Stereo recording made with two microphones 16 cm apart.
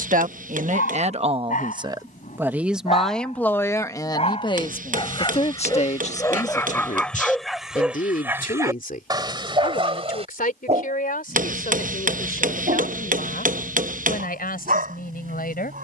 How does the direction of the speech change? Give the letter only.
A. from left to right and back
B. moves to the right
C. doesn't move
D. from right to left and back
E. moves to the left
E.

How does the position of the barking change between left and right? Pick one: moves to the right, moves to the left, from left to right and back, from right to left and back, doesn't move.
moves to the right.